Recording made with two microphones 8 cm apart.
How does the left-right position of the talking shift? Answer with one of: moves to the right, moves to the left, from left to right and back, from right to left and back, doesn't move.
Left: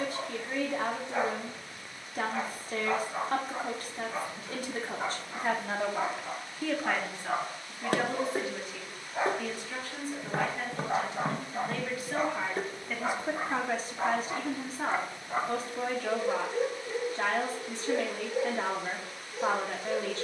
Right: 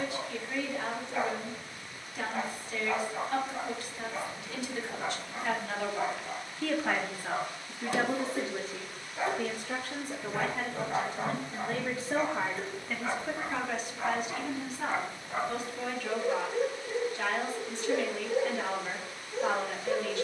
from left to right and back.